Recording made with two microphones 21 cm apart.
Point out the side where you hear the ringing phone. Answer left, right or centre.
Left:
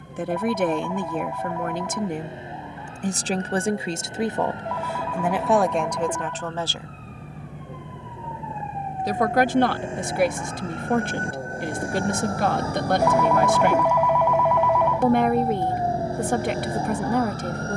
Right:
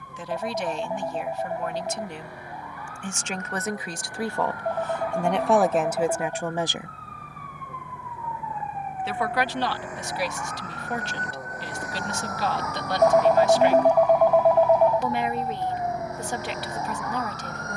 right.